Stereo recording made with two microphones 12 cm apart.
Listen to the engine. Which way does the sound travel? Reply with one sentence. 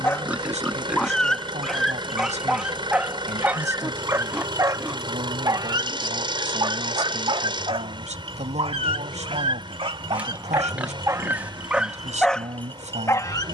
In this clip you hear the engine stay in one place.